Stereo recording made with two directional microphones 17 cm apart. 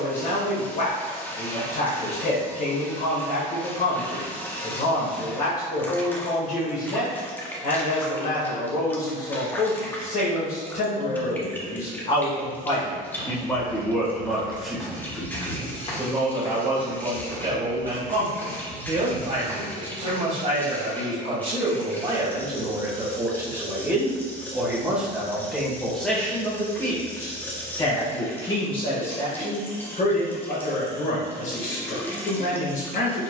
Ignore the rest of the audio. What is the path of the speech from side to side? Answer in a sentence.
You can hear the speech move from left to right and back again.